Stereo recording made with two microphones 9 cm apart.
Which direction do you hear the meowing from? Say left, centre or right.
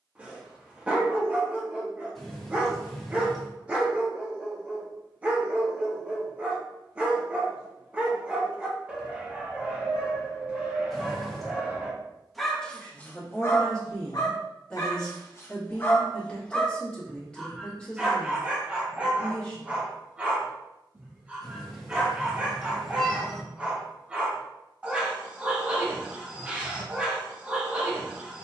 centre.